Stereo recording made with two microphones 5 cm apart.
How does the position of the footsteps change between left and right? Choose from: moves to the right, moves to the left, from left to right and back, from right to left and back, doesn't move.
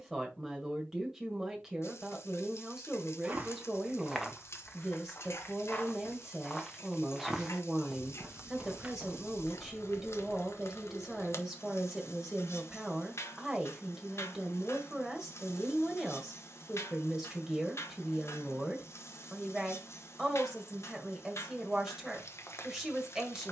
from right to left and back.